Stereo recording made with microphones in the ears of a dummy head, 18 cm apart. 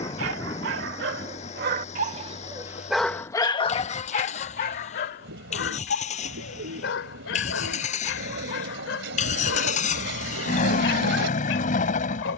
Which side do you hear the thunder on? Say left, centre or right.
left.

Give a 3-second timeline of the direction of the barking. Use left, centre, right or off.
right, left, left, left.